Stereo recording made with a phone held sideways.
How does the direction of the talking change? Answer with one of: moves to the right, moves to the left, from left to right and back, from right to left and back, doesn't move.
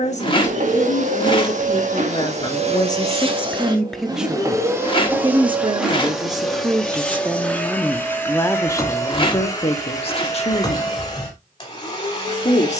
from left to right and back.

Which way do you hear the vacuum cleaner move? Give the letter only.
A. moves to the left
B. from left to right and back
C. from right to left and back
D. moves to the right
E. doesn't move
A.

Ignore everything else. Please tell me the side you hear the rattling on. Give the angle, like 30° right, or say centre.
30° left.